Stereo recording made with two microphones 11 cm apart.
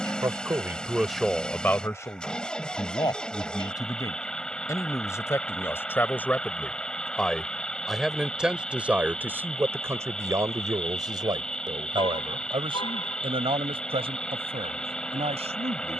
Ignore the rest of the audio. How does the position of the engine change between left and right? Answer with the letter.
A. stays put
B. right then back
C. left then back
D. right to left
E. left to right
A.